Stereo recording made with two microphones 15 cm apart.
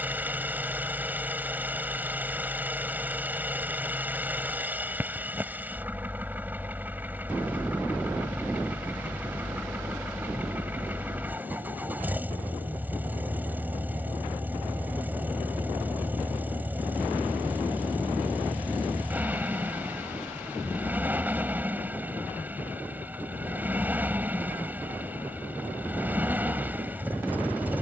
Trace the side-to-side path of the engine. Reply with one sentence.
In this clip you hear the engine stay in one place.